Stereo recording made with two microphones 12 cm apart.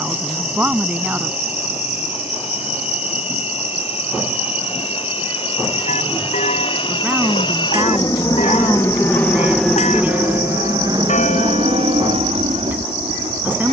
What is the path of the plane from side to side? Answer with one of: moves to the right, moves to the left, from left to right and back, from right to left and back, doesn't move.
moves to the right.